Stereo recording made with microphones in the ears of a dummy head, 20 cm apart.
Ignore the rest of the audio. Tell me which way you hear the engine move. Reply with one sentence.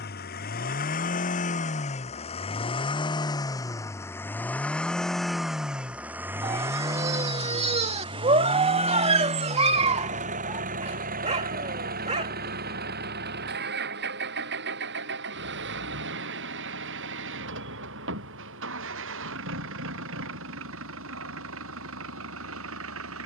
In this clip you hear the engine move to the right.